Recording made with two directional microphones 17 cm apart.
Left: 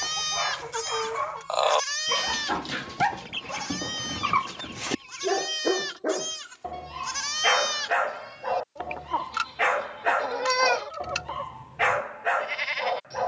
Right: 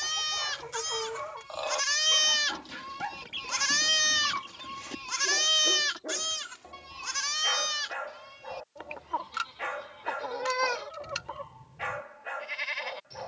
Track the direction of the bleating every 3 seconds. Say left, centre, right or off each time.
centre, right, centre, left, left.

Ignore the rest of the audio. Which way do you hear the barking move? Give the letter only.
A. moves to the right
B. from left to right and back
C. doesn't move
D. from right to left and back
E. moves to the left
C.